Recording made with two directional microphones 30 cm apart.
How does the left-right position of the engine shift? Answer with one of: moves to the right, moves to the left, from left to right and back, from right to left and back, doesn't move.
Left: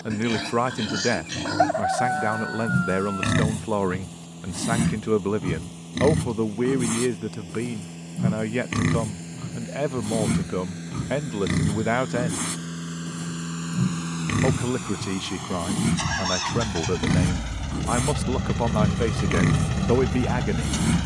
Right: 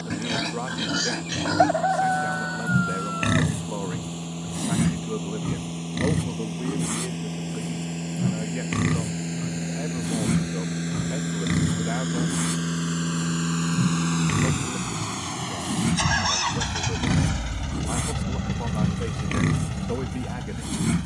moves to the left.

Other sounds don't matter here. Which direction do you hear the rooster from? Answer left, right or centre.
centre.